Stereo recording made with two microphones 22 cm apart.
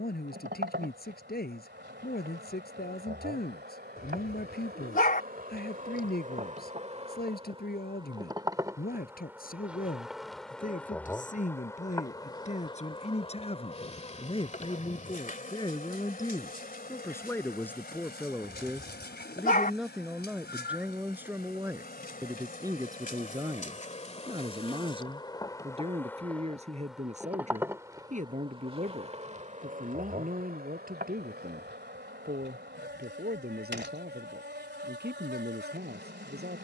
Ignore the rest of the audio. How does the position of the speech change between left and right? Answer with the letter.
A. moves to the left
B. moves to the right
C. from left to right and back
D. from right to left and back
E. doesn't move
B.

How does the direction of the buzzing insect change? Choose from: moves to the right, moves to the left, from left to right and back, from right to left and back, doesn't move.
from right to left and back.